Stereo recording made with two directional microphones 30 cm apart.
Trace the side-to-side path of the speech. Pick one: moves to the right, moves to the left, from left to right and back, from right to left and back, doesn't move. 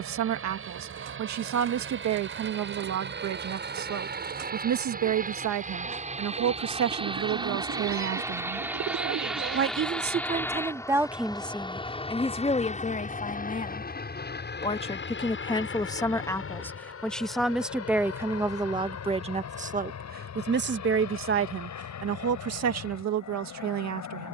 from right to left and back.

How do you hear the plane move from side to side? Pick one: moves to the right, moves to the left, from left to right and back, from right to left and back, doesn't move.
moves to the left.